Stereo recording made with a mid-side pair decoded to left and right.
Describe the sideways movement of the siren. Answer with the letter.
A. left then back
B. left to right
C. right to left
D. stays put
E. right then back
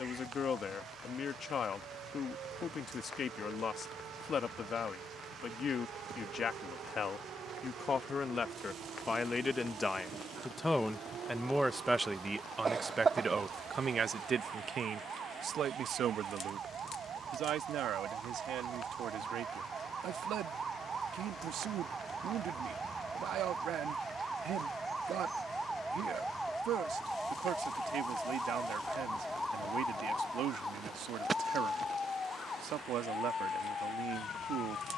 C.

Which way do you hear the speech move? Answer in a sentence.
You can hear the speech move from left to right.